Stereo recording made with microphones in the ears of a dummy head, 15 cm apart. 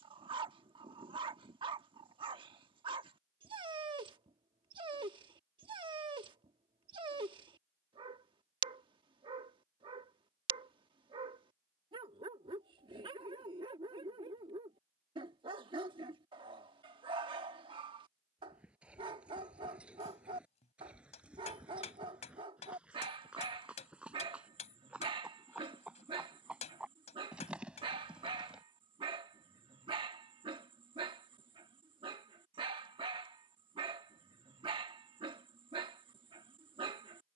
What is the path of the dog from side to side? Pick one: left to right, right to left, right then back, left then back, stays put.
stays put.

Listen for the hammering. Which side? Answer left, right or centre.
left.